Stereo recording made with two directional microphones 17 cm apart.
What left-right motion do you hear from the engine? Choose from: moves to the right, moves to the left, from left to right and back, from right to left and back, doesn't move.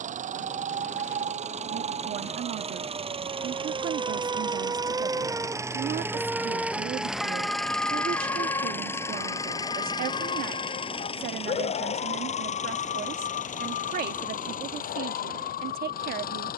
moves to the left.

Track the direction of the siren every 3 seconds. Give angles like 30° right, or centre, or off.
40° right, 20° right, 10° left, 40° left, 60° left, 70° left.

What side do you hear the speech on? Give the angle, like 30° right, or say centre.
60° right.